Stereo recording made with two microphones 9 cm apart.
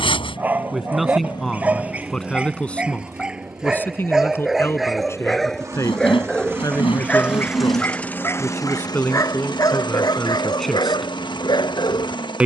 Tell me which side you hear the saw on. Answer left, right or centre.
left.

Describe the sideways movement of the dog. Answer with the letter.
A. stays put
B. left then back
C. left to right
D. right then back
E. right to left
E.